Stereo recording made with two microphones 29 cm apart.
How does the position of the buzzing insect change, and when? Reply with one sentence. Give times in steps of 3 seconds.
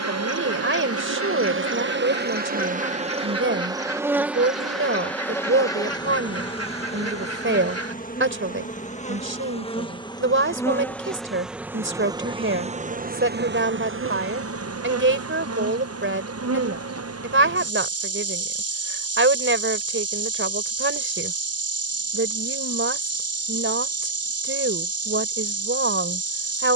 You can hear the buzzing insect on the right from 0 s, in the centre from 3 s, on the left from 6 s, in the centre from 9 s and on the right from 12 s.